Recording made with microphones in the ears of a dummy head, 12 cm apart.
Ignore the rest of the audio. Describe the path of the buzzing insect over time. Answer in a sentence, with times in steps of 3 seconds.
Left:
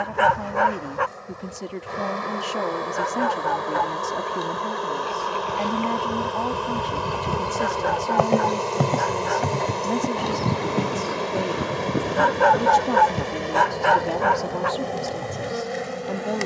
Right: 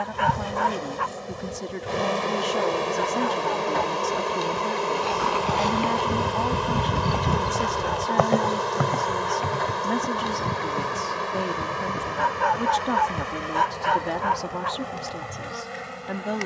In this clip you hear the buzzing insect on the right from 0 s, in the centre from 3 s and on the left from 9 s.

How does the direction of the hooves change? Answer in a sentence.
You can hear the hooves travel towards the left.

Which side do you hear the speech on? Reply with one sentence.
In this clip you hear the speech in the centre.